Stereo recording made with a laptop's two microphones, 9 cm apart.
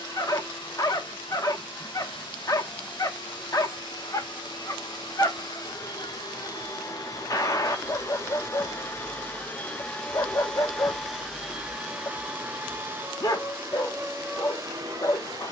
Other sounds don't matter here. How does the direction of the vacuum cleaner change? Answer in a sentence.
In this clip you hear the vacuum cleaner move to the right.